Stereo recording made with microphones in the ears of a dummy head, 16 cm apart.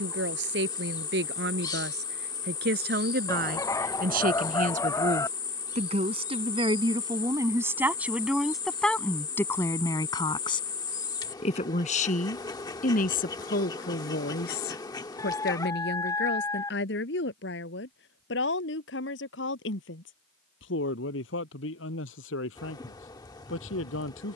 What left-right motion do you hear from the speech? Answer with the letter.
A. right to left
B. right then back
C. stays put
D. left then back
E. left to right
A.